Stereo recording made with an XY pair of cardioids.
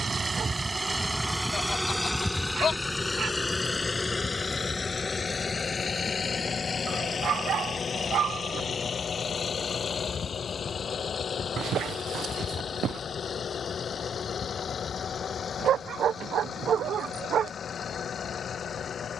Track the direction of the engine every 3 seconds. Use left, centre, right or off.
centre, left, left, left, left, left, left.